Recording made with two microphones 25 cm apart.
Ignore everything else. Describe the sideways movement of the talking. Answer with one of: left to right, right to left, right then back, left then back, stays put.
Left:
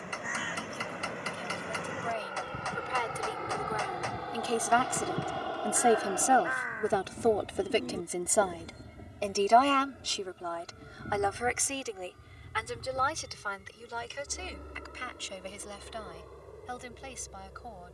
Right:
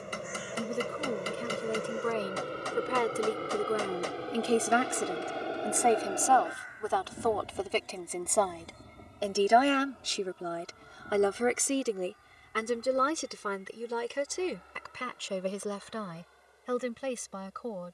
left then back.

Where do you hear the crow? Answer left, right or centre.
left.